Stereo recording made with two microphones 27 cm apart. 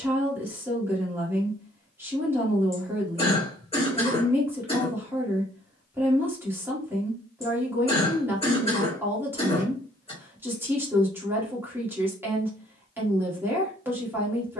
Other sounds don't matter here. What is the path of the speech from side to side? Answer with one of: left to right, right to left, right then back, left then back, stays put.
stays put.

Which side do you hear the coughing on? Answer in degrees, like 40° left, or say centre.
20° left.